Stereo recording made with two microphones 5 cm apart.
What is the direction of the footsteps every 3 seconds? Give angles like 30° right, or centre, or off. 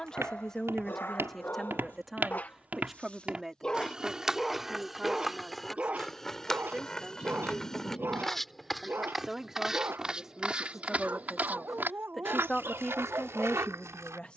50° right, 10° right, 10° left, 20° right, 60° right.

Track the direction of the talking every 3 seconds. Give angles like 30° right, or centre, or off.
10° left, 10° right, 10° right, centre, 10° left.